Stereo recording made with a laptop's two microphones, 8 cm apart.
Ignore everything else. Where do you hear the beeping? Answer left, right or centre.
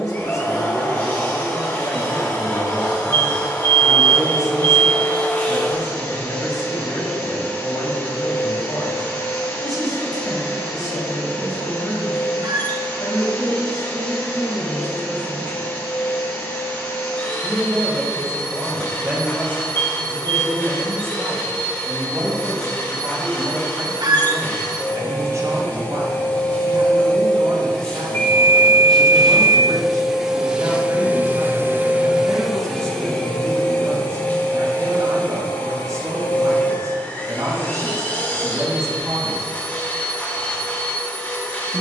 left.